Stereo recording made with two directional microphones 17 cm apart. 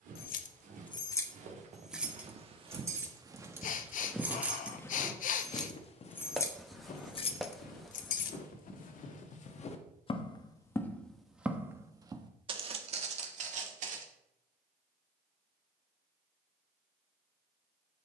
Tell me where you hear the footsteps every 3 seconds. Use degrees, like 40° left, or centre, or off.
40° right, 10° left, 60° left, 20° left, 40° right, off.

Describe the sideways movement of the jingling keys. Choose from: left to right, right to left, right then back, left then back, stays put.
right then back.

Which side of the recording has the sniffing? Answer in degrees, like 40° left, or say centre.
50° left.